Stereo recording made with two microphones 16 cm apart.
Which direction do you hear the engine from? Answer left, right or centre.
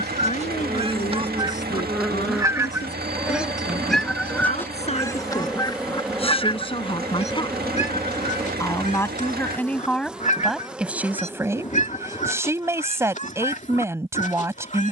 right.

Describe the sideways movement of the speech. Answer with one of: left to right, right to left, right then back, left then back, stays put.
left to right.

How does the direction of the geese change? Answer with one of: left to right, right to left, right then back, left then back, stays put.
right to left.